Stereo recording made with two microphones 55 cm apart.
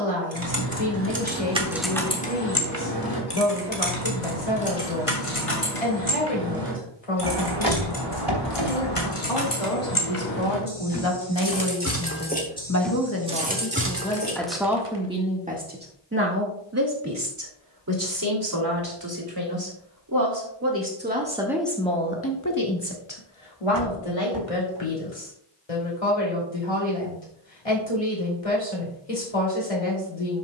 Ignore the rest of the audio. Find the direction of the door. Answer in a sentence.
You can hear the door on the right.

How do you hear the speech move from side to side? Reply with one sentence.
You can hear the speech go right and come back.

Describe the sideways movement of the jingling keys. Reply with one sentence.
In this clip you hear the jingling keys move from right to left and back again.